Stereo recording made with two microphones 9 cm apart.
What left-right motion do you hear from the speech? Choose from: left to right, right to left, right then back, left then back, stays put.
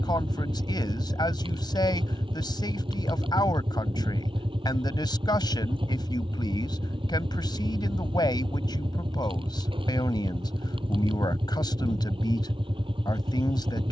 stays put.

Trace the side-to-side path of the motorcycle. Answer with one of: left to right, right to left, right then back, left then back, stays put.
stays put.